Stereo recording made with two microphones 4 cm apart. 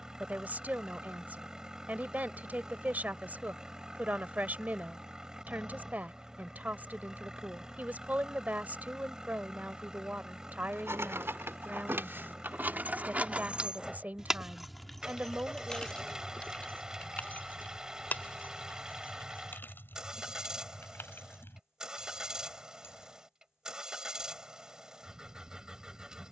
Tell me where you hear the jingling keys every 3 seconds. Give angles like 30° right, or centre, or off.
off, off, off, 60° right, 30° right, 30° left, 50° left, 60° left, off.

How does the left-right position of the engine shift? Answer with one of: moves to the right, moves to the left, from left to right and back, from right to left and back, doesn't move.
doesn't move.